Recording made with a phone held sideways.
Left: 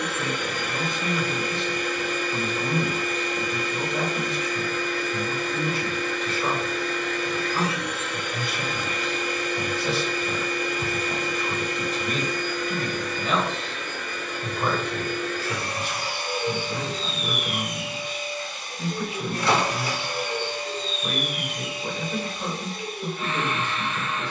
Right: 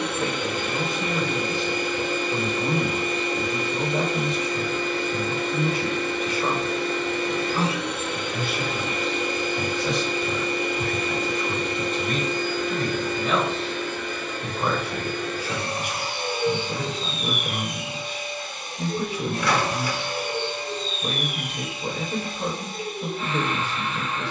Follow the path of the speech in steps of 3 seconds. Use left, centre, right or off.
right, right, centre, centre, centre, right, right, right.